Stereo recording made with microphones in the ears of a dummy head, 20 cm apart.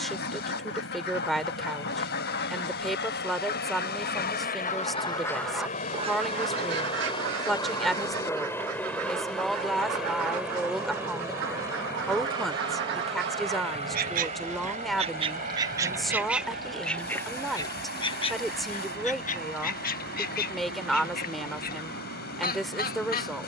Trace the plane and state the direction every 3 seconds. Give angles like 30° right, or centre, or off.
60° left, 40° left, 20° left, 10° right, 20° right, 40° right, 40° right, 50° right.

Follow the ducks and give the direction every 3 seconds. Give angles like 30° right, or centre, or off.
50° left, 30° left, 60° right, 70° right, 50° right, centre, 40° left, 40° left.